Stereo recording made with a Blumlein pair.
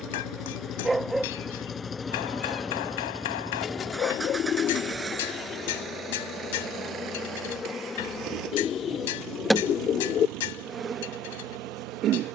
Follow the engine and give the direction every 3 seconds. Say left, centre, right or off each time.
left, centre, right, right.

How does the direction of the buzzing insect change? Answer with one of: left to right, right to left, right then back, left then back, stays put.
left then back.